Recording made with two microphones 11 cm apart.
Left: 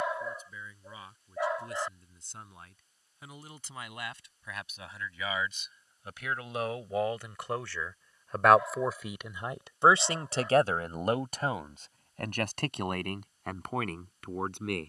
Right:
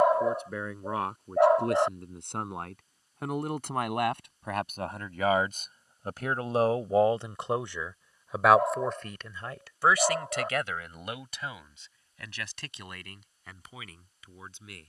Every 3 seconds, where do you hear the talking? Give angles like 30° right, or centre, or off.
70° right, 60° right, 20° right, 30° left, 60° left.